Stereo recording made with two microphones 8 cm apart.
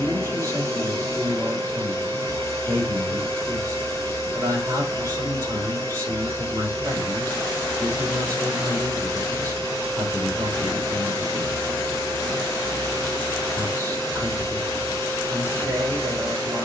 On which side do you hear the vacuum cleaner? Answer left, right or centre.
right.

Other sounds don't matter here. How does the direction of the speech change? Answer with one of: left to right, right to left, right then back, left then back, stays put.
stays put.